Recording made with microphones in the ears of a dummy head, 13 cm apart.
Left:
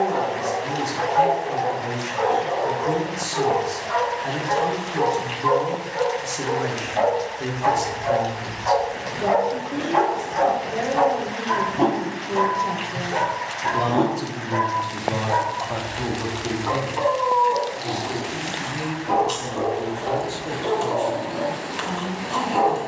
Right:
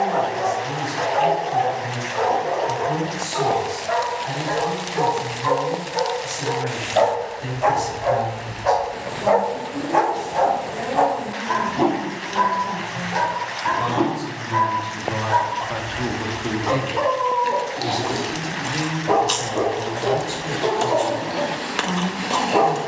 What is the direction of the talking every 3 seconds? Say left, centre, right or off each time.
left, left, left, left, left, centre, right, right.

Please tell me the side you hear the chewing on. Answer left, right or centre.
right.